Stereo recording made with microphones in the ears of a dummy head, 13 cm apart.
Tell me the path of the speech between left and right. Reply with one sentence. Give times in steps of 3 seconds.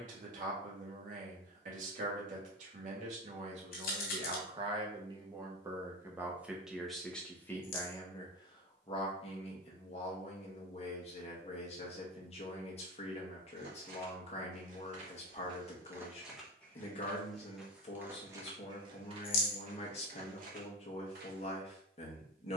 You can hear the speech on the right from 0 s, in the centre from 6 s and on the left from 9 s.